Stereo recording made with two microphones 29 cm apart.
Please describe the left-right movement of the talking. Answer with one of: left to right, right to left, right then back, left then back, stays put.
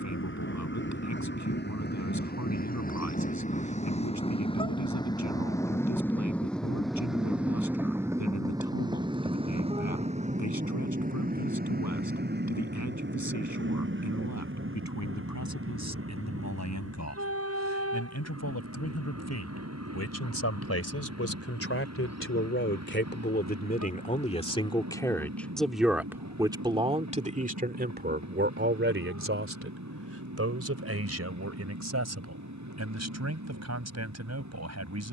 left to right.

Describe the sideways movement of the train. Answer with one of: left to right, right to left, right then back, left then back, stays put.
left to right.